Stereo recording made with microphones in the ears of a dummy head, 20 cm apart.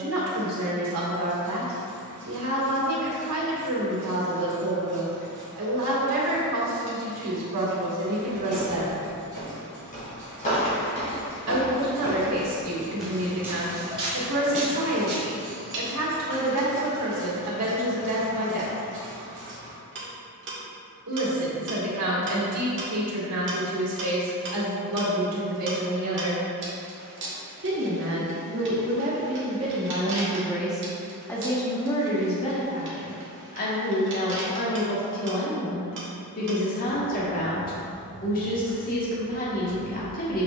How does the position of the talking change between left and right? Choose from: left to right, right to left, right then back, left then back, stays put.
right to left.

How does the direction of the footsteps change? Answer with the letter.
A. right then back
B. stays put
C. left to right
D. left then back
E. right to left
C.